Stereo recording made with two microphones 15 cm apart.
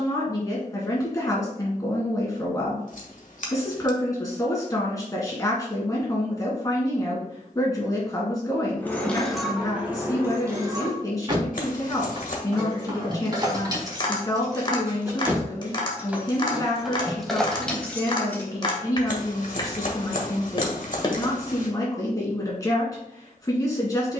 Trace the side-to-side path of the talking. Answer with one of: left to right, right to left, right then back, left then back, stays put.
stays put.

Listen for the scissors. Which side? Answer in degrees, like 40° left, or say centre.
60° left.